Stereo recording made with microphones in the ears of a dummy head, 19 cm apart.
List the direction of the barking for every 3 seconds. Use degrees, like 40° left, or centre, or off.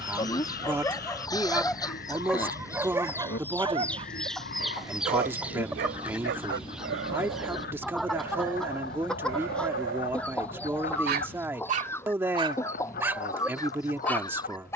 10° left, 40° right, 70° right, 60° right, centre.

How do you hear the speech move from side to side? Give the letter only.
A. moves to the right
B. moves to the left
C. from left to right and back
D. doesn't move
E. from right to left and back
D.